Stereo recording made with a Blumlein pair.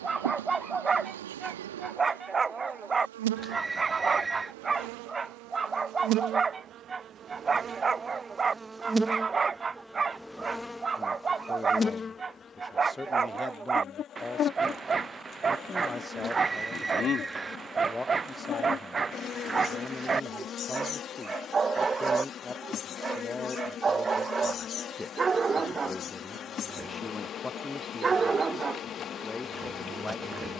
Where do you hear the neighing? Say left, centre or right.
centre.